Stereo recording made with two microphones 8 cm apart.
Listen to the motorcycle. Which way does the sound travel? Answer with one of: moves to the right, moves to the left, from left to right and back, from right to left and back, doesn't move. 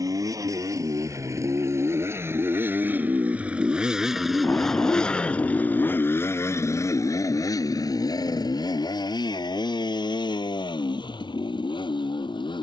moves to the left.